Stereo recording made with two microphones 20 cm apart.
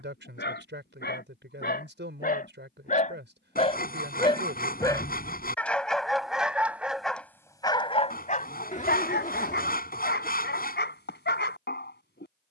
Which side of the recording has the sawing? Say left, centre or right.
left.